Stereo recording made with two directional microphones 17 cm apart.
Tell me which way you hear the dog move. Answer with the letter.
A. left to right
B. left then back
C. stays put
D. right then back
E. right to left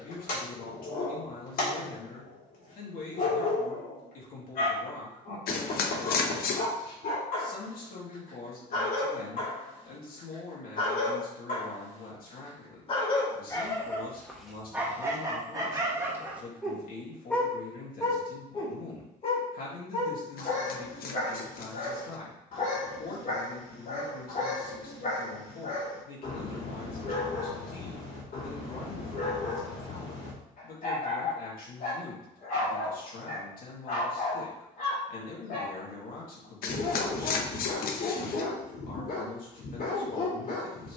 D.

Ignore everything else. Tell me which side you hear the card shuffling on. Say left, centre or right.
left.